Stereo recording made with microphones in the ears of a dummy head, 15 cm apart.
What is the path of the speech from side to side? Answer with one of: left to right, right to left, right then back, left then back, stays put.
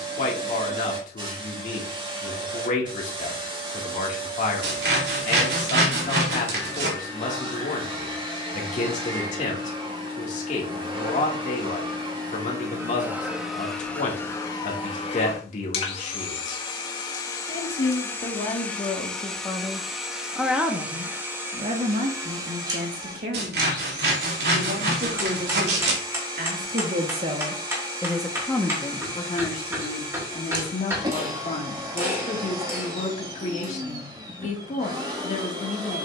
right then back.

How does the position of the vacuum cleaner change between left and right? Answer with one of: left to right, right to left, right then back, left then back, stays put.
left then back.